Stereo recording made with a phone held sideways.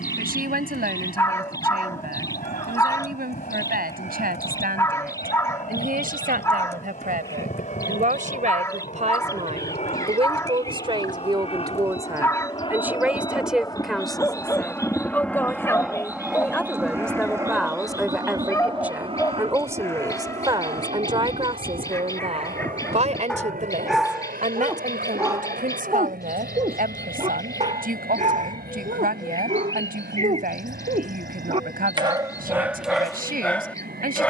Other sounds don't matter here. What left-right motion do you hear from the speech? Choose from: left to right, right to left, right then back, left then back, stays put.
left then back.